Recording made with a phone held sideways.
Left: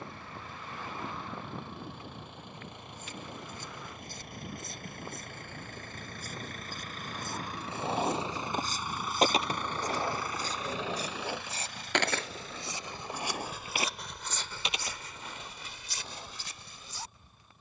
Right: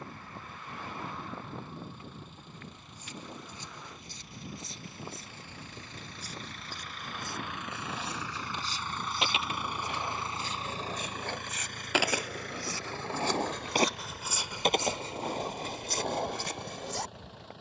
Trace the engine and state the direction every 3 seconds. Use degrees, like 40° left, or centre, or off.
70° left, 60° left, 40° left, 30° right, 70° right, 80° right.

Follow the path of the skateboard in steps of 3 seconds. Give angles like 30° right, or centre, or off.
off, off, 50° left, 20° left, 30° right, 60° right.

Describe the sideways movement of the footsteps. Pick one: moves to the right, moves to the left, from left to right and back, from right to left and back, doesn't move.
moves to the right.